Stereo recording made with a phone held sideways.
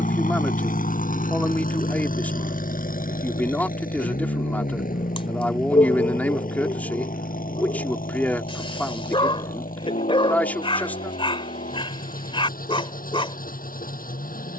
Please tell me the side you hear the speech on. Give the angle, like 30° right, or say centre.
10° left.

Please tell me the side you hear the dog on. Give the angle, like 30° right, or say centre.
40° left.